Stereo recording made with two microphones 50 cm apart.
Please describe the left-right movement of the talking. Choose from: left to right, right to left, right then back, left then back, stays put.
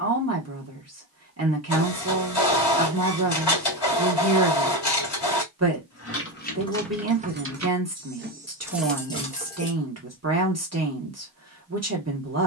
stays put.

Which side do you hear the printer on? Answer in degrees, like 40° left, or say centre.
50° left.